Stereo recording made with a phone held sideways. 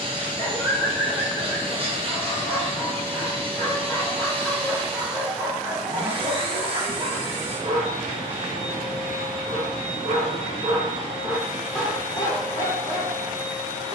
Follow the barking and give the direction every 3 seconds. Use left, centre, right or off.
left, centre, right, right, left.